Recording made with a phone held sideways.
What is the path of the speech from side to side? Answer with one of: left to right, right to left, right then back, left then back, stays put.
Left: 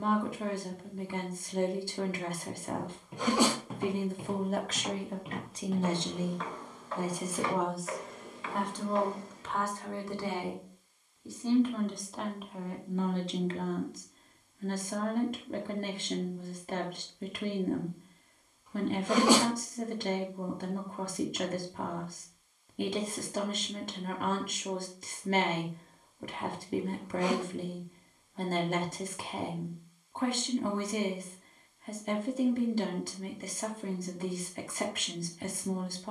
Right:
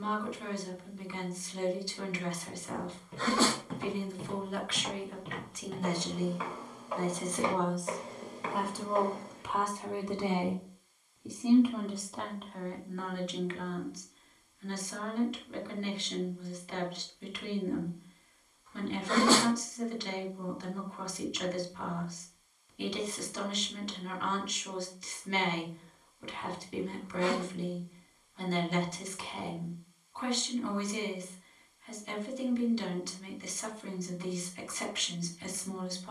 right then back.